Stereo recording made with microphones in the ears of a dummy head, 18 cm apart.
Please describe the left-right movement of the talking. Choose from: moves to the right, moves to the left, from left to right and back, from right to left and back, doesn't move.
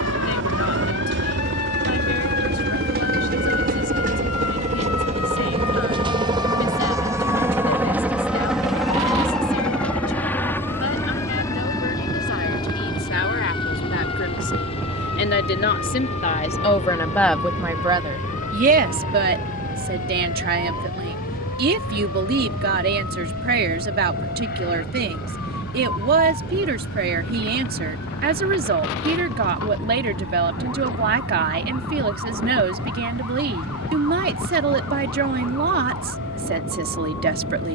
moves to the right.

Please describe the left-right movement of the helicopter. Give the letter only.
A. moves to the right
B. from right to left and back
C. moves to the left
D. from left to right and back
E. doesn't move
C.